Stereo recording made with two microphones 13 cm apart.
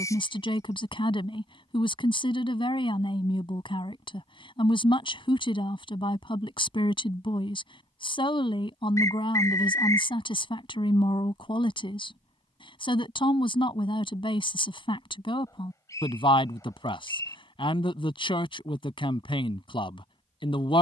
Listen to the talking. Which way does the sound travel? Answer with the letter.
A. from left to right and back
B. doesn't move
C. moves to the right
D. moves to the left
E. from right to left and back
B.